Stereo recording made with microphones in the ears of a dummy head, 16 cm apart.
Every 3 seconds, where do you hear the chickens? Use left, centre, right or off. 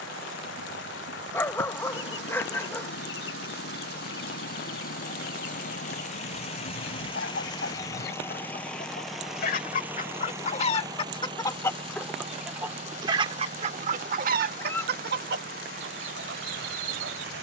left, left, left, left, right, right.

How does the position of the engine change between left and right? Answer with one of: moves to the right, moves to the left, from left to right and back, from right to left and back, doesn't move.
moves to the right.